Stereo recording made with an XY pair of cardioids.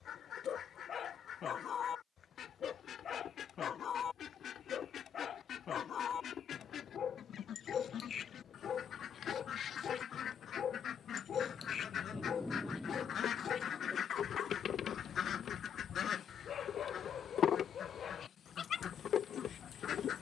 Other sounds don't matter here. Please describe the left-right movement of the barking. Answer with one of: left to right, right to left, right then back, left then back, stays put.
stays put.